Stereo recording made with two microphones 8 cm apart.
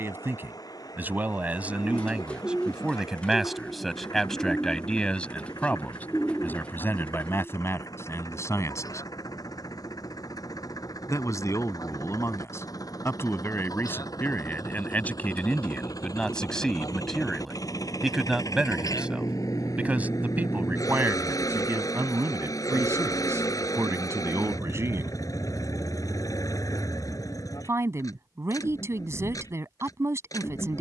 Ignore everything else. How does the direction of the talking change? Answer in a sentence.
You can hear the talking move from right to left and back again.